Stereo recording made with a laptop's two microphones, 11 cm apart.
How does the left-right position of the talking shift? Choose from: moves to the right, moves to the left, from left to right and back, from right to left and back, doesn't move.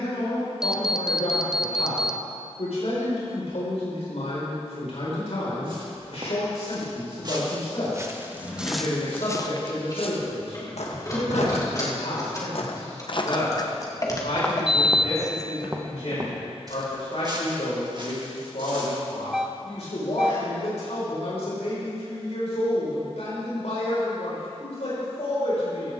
doesn't move.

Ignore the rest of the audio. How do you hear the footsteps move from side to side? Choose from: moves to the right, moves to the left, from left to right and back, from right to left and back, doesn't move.
from right to left and back.